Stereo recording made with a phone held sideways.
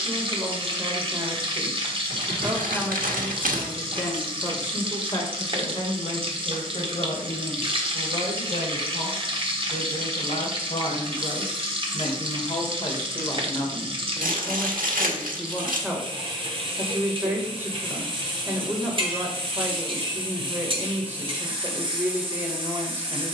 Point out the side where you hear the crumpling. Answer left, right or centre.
right.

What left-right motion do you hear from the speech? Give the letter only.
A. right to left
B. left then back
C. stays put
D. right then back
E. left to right
B.